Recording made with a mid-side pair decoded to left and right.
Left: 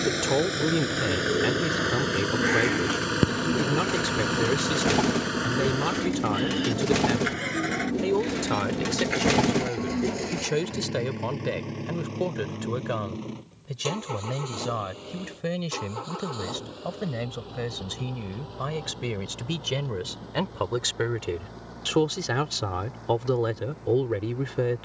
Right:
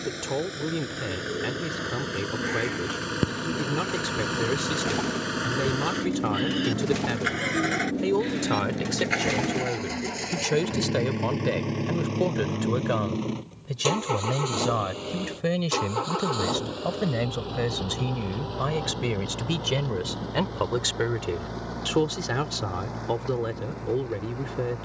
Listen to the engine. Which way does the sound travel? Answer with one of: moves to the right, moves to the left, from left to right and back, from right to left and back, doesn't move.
moves to the right.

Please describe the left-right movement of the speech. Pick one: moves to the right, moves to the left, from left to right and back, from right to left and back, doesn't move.
from left to right and back.